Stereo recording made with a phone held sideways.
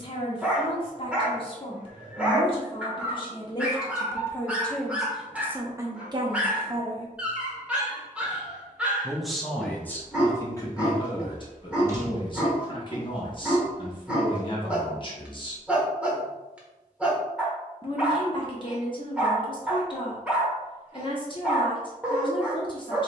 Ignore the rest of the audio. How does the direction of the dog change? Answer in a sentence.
In this clip you hear the dog stay put.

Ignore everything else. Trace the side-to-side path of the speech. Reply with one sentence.
In this clip you hear the speech go right and come back.